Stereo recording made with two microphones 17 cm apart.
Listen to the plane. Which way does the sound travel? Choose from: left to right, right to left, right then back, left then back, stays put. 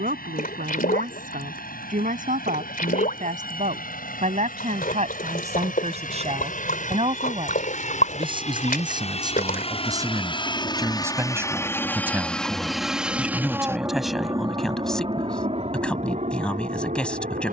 left to right.